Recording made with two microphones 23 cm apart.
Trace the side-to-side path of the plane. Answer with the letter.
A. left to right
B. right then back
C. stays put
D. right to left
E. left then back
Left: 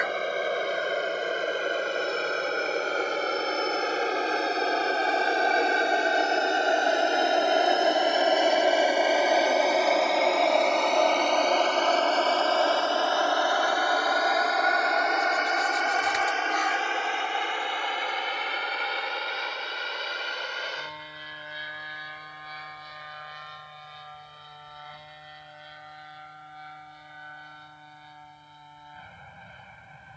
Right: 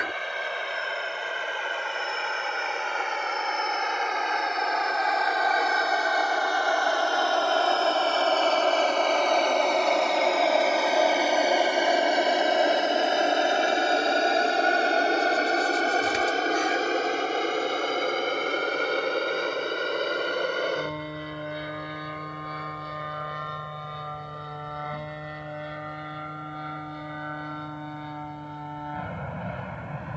A.